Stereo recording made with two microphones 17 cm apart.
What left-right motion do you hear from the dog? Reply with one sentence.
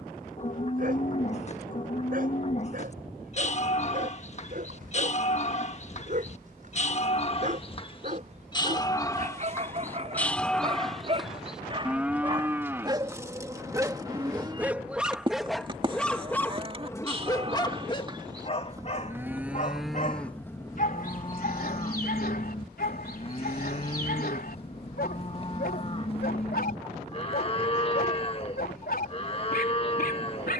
In this clip you hear the dog travel towards the left.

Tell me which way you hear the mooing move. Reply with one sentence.
In this clip you hear the mooing go right and come back.